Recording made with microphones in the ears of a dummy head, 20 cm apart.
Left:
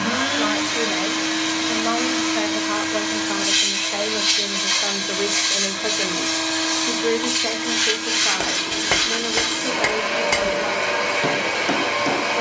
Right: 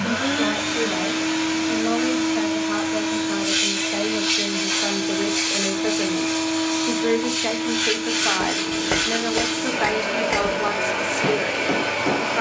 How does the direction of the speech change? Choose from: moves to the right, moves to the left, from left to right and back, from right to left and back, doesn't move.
moves to the right.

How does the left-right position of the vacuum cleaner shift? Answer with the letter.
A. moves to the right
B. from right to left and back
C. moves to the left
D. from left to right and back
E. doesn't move
E.